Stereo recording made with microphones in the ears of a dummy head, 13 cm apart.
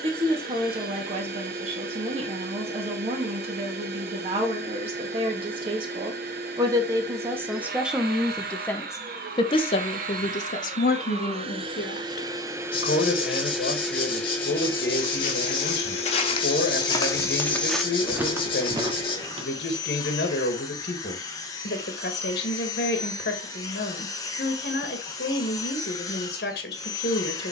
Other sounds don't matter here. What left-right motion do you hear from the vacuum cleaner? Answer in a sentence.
In this clip you hear the vacuum cleaner go from the right side to the left.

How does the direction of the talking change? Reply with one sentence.
In this clip you hear the talking move to the left.